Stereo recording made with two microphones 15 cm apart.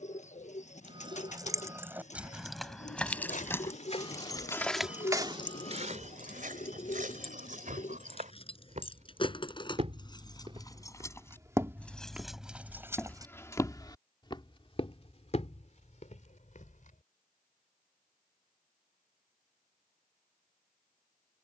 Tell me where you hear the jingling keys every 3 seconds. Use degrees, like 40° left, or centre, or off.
10° right, 20° left, 40° left, 30° left, 10° right, off, off.